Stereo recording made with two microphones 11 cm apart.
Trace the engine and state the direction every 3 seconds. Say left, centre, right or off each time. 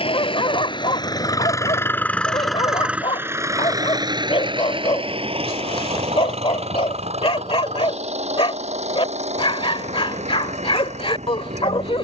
left, right, right, right.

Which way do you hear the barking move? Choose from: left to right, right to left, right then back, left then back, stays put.
stays put.